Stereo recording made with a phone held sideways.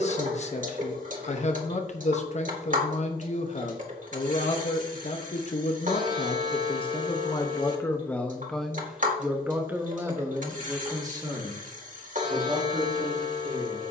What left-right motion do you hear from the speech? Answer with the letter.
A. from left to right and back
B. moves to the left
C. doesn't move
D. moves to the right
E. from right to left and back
D.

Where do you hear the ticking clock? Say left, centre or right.
right.